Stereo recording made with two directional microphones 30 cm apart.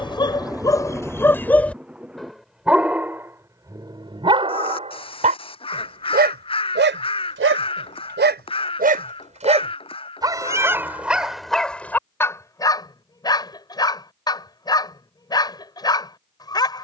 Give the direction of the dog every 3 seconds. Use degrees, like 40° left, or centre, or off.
10° left, 20° right, 30° right, 10° right, 10° left, 10° left.